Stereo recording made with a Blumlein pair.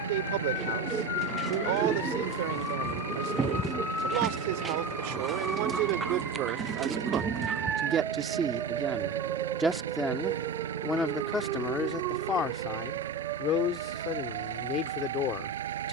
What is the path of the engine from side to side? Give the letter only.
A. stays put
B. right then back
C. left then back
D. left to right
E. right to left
A.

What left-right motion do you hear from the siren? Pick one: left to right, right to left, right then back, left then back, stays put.
left to right.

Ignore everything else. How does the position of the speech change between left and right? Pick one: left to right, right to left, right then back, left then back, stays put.
right to left.